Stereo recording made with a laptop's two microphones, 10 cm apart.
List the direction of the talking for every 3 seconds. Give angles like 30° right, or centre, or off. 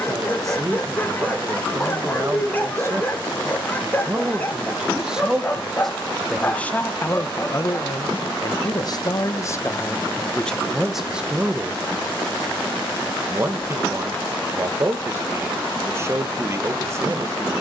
30° right, 10° right, 30° left, 10° left, 30° right, 30° right.